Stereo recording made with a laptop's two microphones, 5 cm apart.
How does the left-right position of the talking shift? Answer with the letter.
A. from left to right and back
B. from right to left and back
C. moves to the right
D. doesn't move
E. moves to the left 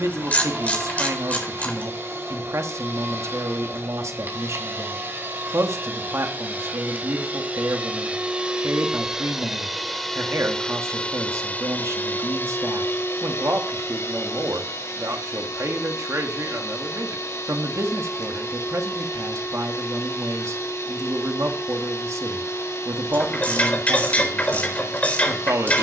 D.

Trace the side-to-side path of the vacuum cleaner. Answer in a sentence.
You can hear the vacuum cleaner go from the right side to the left.